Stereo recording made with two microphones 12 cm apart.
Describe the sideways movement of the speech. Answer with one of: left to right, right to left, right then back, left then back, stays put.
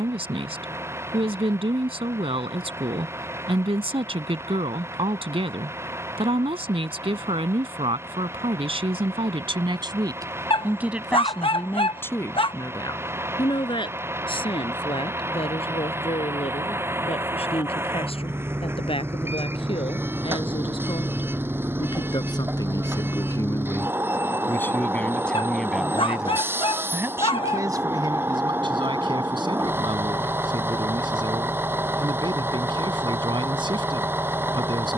left then back.